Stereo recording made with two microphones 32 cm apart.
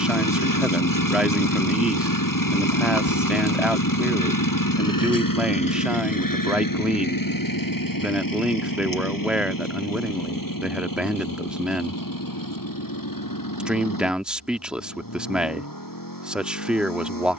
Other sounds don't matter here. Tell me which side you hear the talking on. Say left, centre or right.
centre.